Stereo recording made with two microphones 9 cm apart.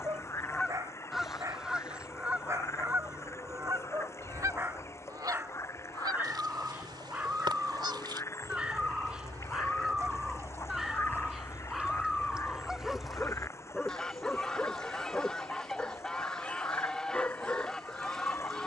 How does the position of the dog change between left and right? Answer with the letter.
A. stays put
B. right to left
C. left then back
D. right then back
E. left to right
B.